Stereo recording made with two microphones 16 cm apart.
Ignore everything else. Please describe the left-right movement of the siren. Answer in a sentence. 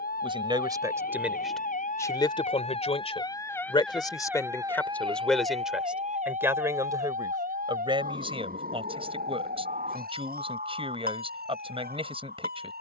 In this clip you hear the siren move from left to right.